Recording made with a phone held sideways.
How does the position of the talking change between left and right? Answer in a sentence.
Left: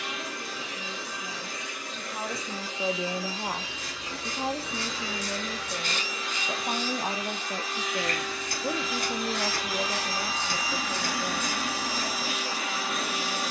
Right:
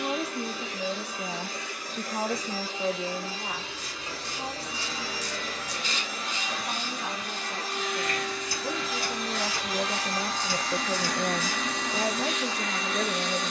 In this clip you hear the talking move from right to left and back again.